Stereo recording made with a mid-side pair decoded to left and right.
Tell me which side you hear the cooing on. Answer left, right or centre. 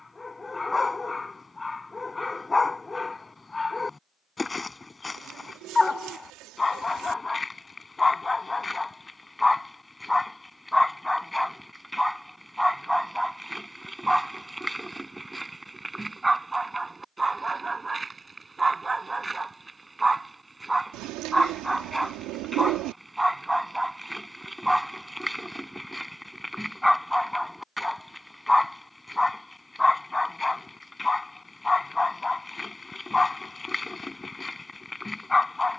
right.